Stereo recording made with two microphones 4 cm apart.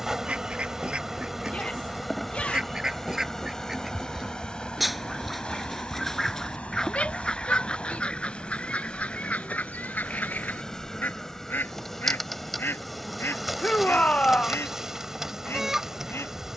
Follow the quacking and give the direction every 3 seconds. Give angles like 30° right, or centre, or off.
30° right, 10° right, 20° left, 40° left, 60° left, 70° left.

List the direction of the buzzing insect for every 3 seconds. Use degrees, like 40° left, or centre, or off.
centre, 20° left, 30° left, 20° left, centre, 10° right.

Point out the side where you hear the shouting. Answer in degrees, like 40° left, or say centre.
40° left.